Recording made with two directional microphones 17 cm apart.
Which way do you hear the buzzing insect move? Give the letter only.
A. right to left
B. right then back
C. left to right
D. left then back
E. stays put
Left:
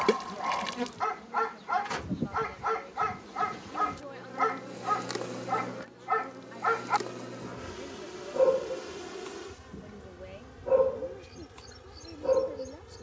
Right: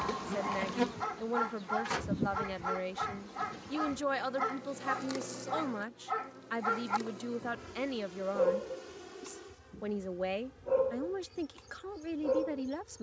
A.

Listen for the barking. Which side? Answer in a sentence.
In this clip you hear the barking on the left.